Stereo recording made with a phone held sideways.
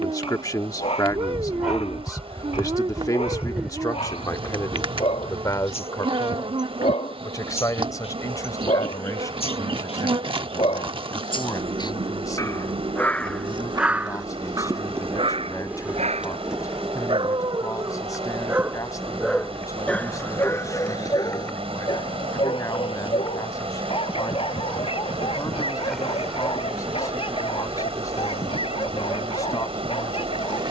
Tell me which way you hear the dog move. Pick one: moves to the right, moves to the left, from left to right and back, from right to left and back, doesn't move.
from left to right and back.